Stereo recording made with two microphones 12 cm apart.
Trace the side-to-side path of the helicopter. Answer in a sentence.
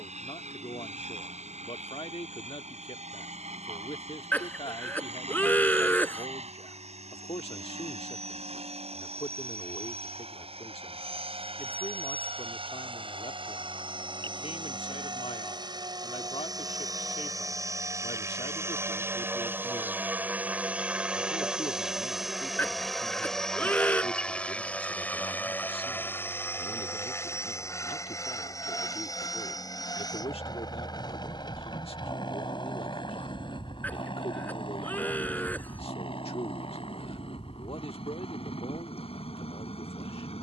In this clip you hear the helicopter go from the right side to the left.